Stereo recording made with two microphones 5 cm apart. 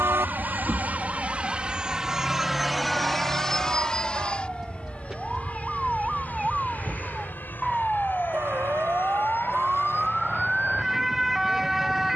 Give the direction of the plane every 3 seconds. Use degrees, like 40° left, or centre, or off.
20° right, 20° left, 40° left, 50° left.